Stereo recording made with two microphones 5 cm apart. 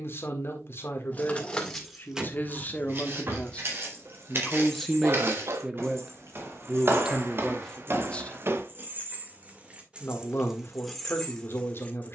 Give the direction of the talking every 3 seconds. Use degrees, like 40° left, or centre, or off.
40° left, 10° left, centre, 50° left.